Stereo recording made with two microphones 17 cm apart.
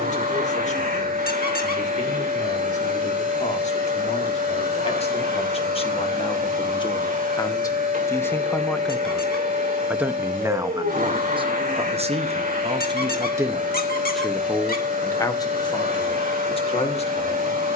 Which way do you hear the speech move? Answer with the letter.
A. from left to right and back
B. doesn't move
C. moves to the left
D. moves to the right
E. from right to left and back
A.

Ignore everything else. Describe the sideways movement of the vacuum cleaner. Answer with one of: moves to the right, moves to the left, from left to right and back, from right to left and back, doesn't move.
doesn't move.